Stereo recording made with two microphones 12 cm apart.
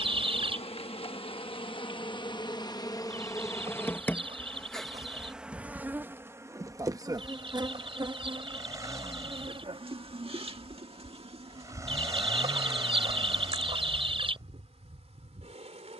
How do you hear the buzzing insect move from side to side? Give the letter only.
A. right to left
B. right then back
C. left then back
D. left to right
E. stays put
D.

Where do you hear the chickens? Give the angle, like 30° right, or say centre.
50° right.